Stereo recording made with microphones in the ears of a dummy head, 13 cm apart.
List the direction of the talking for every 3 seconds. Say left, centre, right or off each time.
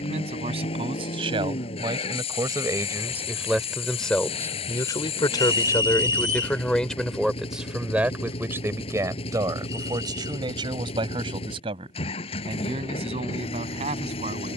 right, centre, centre, right, right.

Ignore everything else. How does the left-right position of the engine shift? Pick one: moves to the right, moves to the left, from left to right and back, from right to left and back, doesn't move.
doesn't move.